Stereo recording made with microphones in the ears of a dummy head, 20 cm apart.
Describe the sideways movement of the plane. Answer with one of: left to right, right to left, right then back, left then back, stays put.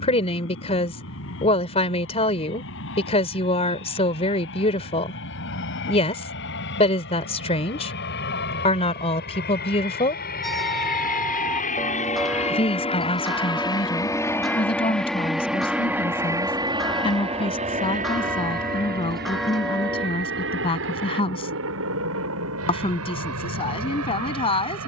left to right.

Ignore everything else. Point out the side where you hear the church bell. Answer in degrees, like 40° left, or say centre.
centre.